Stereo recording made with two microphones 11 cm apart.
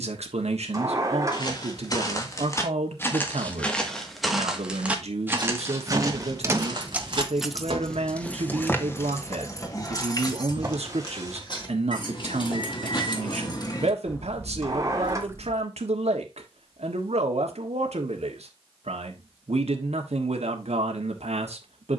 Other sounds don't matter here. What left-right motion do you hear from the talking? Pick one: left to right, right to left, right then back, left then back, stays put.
stays put.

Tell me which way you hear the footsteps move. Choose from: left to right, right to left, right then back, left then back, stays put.
left to right.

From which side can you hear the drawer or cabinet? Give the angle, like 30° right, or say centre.
30° right.